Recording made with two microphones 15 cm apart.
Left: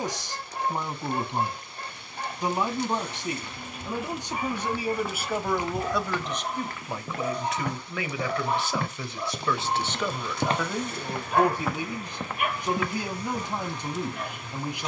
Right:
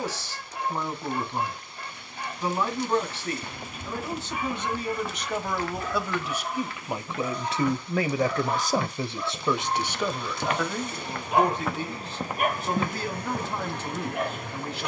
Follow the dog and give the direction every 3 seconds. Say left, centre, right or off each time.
left, left, left, centre, right.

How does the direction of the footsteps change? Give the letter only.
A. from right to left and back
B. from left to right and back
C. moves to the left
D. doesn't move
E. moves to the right
A.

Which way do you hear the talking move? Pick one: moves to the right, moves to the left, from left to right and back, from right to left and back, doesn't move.
from left to right and back.